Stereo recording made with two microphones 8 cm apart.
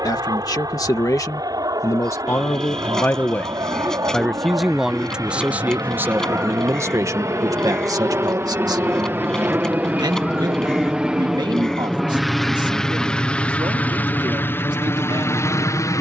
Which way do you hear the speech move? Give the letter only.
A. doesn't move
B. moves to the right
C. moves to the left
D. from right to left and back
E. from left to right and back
B.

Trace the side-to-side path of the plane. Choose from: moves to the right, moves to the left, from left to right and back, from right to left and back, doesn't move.
moves to the left.